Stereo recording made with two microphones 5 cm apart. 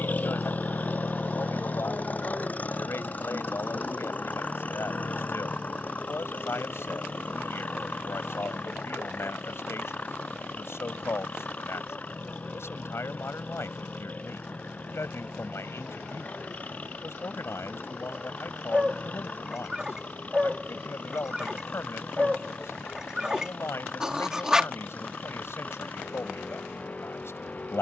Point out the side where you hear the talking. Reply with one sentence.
In this clip you hear the talking on the left.